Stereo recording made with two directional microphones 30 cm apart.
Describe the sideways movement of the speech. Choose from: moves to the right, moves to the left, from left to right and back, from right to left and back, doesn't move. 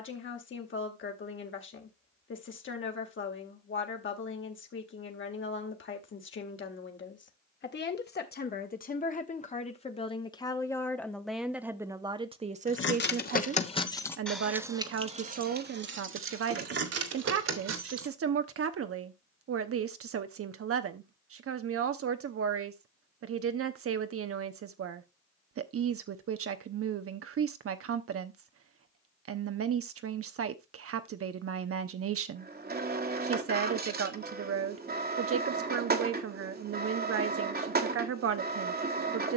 moves to the right.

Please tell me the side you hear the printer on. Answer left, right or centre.
right.